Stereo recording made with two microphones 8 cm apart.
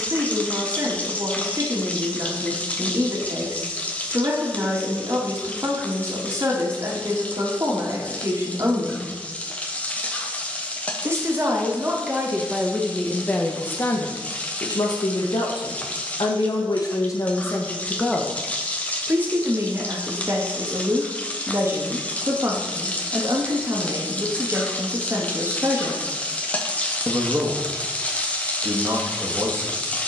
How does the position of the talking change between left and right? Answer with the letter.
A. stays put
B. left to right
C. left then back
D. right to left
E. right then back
C.